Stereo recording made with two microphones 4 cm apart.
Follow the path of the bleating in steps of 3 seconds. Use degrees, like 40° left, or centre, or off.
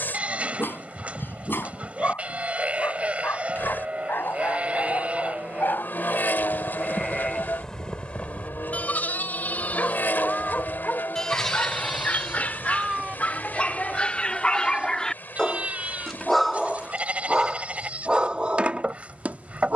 30° right, 30° right, 20° left, 30° left, 30° right, 30° right, 30° right.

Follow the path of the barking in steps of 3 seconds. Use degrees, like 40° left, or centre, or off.
60° left, 60° left, 50° left, 40° left, 30° left, centre, 30° right.